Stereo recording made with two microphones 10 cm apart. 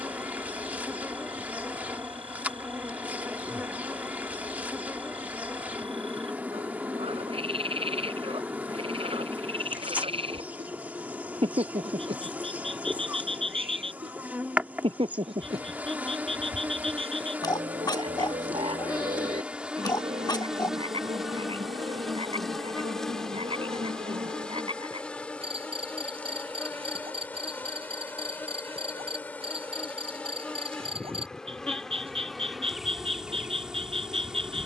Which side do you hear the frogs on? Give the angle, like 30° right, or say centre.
70° right.